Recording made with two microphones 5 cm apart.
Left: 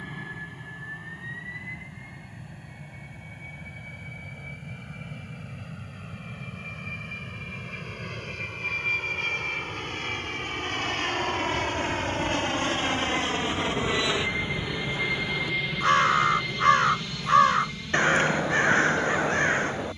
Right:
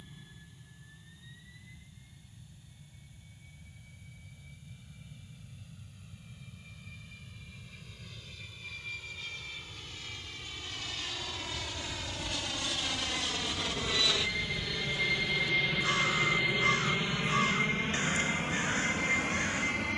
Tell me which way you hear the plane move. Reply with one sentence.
In this clip you hear the plane move to the right.